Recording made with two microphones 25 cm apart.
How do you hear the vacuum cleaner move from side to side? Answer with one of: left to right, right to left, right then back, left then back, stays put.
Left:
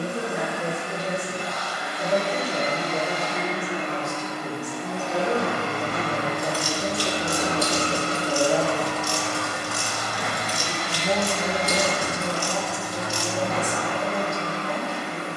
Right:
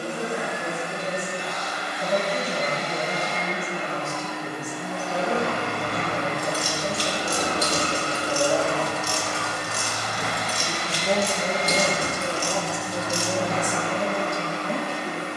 right to left.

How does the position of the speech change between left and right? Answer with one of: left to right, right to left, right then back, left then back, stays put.
left to right.